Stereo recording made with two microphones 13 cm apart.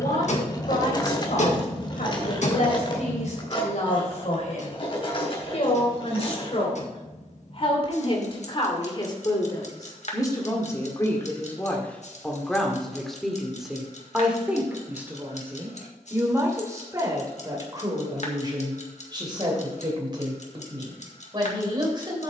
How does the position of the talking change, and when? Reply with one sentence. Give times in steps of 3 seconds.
In this clip you hear the talking on the left from 0 s, in the centre from 12 s and on the right from 15 s.